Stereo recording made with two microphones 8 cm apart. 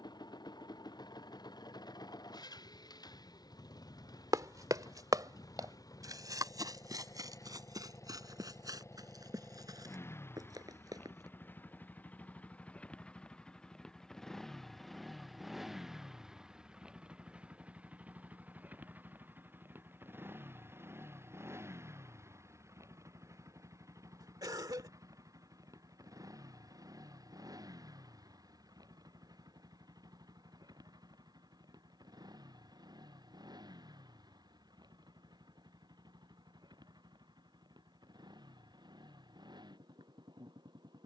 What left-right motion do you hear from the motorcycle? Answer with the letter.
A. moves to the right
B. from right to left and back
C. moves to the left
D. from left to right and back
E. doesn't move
A.